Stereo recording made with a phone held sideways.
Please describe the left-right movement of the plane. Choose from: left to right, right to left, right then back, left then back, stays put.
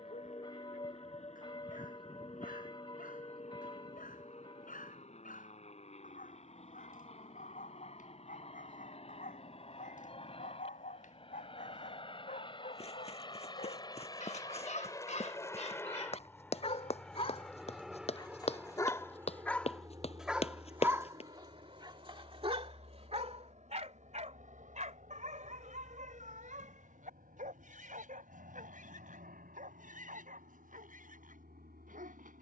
left to right.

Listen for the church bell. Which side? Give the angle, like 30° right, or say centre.
30° left.